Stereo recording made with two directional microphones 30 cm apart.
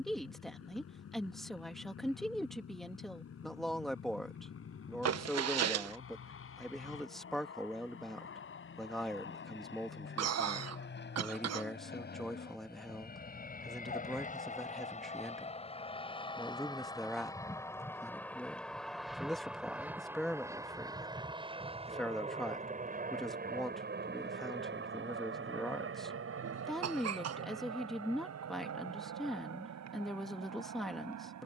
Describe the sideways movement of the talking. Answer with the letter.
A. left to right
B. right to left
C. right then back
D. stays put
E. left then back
D.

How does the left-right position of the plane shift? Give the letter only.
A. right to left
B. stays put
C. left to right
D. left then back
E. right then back
C.